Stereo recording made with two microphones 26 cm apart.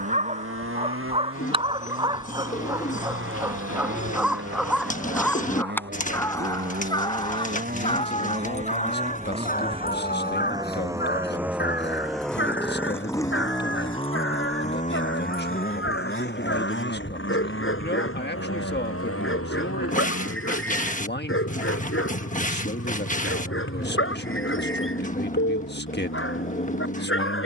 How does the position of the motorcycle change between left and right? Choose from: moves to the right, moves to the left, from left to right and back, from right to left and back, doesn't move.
moves to the left.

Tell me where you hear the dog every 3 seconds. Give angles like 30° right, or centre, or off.
20° right, centre, 20° left, 40° left, 50° left, 50° left, 50° left, 50° left, 50° left.